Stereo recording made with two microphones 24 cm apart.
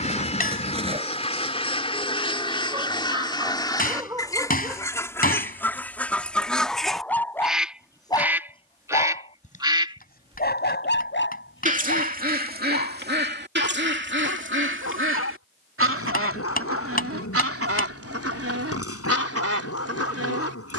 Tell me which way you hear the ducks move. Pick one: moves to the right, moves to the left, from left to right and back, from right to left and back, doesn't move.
moves to the right.